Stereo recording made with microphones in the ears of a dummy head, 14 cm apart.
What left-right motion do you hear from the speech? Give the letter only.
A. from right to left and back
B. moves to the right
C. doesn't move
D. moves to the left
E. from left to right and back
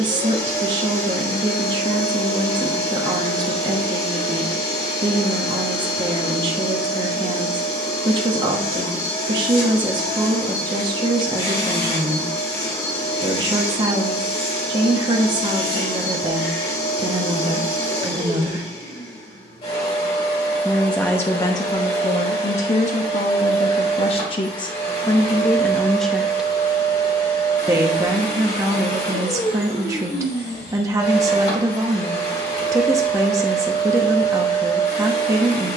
A.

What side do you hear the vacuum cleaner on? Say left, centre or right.
left.